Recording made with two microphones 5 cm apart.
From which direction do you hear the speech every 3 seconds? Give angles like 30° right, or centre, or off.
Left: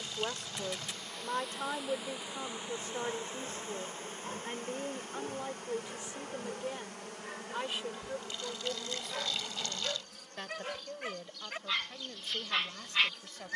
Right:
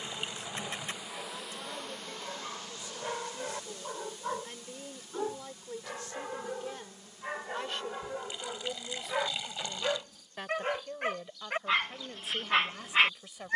50° left, 30° left, 10° left, 10° right, 10° right.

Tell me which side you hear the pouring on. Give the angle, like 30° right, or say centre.
20° right.